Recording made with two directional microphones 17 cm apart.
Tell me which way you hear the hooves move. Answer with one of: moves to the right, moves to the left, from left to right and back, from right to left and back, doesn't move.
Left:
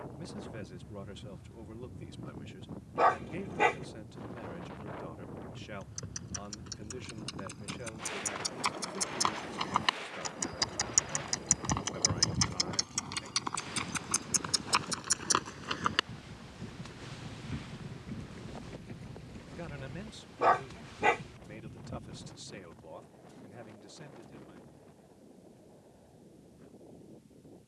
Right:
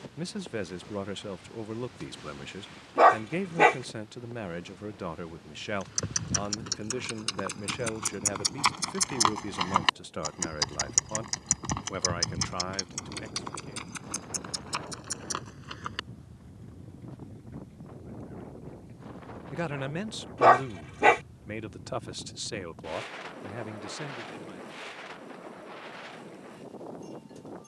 moves to the left.